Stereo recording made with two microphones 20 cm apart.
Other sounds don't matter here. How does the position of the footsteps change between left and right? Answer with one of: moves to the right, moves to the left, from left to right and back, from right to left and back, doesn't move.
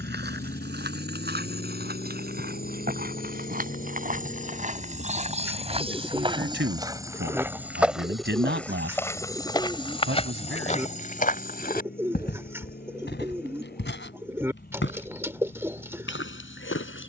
moves to the left.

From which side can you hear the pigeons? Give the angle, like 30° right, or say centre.
10° right.